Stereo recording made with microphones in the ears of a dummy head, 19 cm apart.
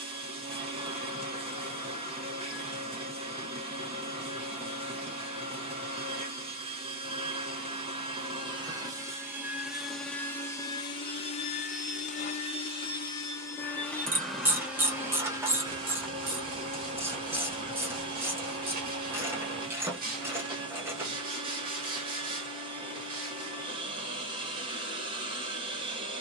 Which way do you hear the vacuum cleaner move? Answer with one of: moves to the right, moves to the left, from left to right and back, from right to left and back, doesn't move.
from right to left and back.